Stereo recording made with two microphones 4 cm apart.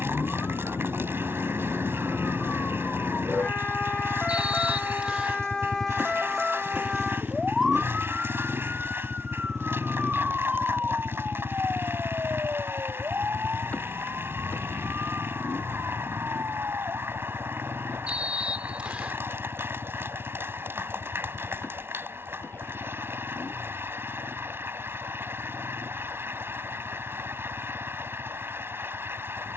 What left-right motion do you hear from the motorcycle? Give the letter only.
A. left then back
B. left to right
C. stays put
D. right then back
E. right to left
E.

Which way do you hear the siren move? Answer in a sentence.
In this clip you hear the siren move from left to right.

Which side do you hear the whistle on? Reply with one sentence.
In this clip you hear the whistle on the right.